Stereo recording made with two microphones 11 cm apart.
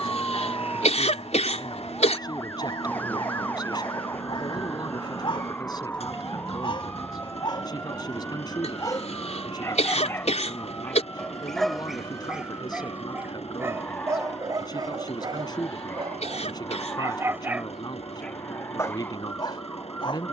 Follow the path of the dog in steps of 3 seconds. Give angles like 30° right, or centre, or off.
50° left, 50° left, 40° left, 10° left, 20° right, 30° right, 40° left.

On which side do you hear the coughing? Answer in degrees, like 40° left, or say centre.
80° left.